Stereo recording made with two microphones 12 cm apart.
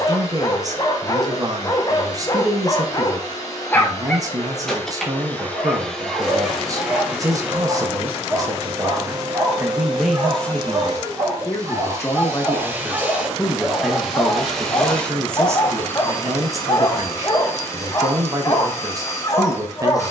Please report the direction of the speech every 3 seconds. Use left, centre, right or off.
right, right, right, centre, centre, right, right.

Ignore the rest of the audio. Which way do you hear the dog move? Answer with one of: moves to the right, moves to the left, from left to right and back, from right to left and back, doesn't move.
from left to right and back.